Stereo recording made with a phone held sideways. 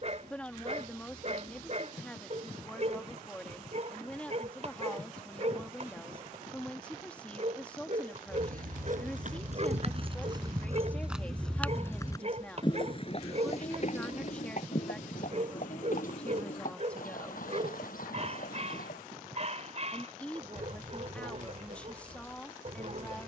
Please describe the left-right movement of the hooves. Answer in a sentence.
You can hear the hooves go from the right side to the left.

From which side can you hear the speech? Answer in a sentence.
You can hear the speech in the centre.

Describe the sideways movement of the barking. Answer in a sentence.
In this clip you hear the barking stay in one place.